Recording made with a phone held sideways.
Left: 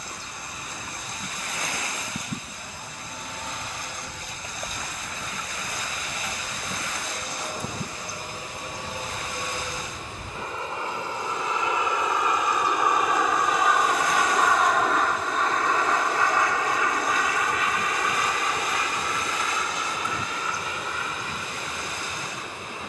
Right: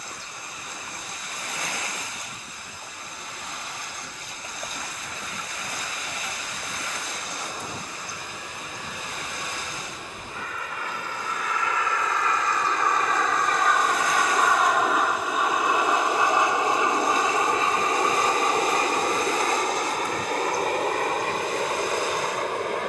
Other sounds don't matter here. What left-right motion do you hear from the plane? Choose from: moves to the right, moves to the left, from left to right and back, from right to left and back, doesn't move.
moves to the right.